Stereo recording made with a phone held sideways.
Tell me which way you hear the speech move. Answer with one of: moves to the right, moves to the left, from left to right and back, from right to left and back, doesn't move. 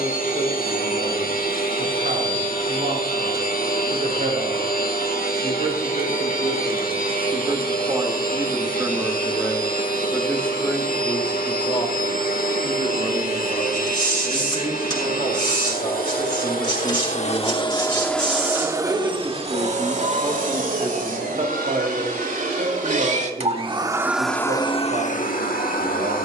from right to left and back.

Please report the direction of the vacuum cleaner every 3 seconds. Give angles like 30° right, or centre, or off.
60° left, 60° left, 60° left, 60° left, 60° left, 50° left, 30° right, 50° right, 40° left.